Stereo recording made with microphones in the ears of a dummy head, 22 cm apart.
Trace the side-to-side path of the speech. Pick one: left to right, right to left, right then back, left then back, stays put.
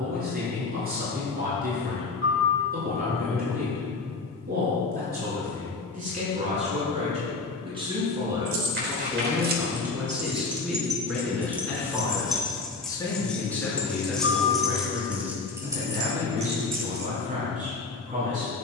left then back.